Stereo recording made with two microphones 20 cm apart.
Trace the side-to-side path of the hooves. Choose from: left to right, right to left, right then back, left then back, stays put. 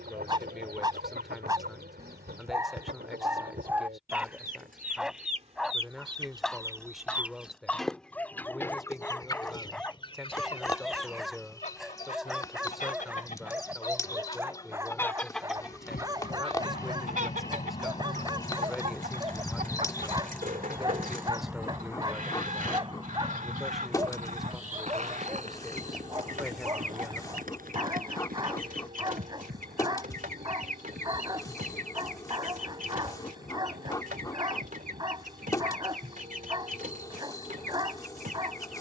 left to right.